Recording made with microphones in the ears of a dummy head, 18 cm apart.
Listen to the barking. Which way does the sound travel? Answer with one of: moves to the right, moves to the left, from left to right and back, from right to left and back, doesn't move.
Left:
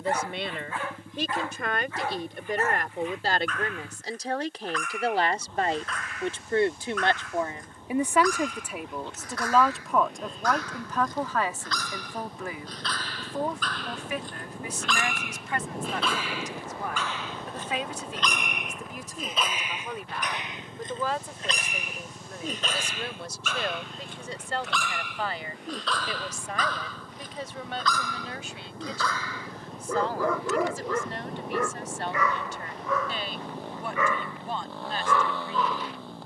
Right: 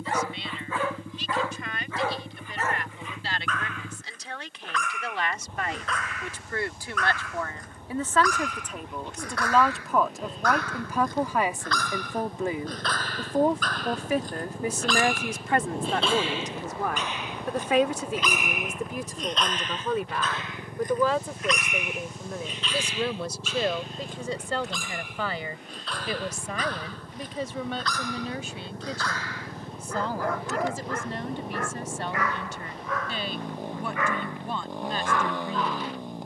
moves to the left.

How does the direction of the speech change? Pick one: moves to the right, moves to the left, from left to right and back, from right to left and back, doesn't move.
moves to the right.